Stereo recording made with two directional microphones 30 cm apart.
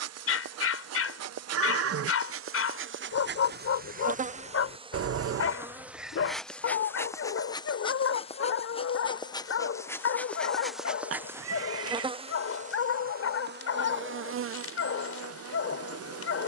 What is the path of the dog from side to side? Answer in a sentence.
You can hear the dog stay put.